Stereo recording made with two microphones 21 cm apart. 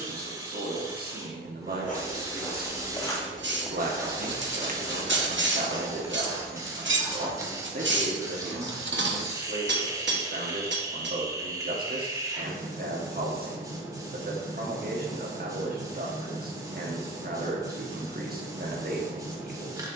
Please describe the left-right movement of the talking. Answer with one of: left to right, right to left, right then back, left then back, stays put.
stays put.